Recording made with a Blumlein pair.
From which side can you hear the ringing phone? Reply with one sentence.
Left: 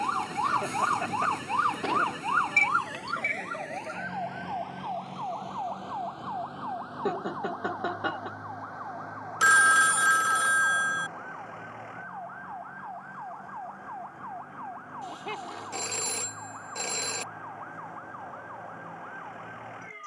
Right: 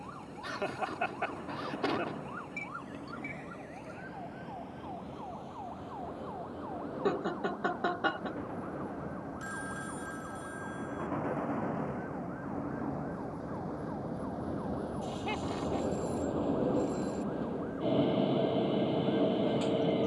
You can hear the ringing phone on the left.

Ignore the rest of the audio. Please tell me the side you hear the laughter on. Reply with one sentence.
In this clip you hear the laughter in the centre.